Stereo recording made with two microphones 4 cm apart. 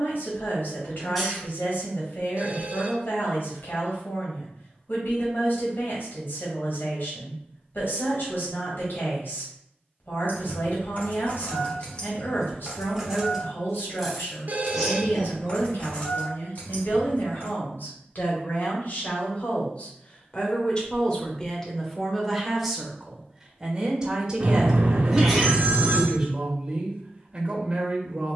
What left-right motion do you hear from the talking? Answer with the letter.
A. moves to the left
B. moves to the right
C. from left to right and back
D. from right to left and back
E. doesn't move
B.